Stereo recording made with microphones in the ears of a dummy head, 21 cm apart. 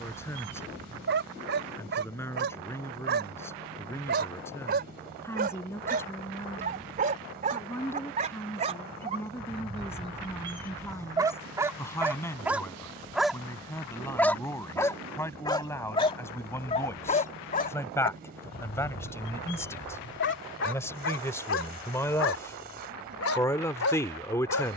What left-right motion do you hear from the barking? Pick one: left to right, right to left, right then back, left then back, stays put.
right to left.